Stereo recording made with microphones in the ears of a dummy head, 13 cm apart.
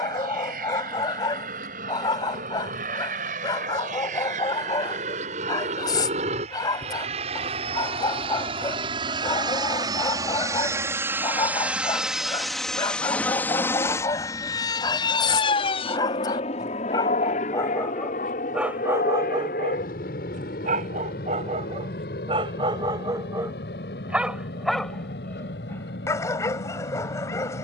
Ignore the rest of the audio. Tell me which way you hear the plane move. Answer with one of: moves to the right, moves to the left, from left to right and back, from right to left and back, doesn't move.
moves to the left.